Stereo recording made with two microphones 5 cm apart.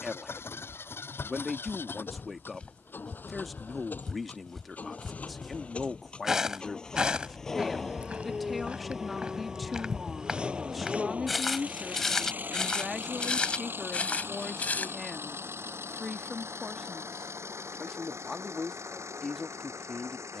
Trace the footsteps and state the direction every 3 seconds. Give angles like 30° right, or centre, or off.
30° left, 10° left, 20° right, 10° right, 20° left, off, off.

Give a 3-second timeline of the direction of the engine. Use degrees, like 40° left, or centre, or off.
50° left, 30° left, 10° left, 20° right, 40° right, 60° right, 60° right.